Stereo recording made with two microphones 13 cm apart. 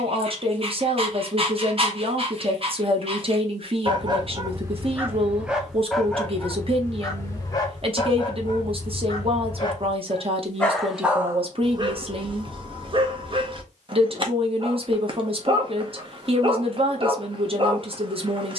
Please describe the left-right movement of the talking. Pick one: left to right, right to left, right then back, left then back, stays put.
stays put.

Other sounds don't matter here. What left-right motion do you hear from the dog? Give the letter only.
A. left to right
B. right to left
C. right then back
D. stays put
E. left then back
E.